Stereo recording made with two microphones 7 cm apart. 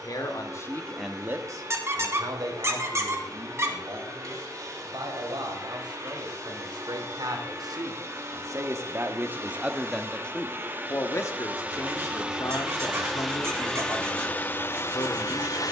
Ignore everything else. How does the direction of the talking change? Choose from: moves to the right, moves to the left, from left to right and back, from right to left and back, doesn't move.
from left to right and back.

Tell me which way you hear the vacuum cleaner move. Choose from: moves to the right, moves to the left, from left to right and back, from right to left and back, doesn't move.
moves to the left.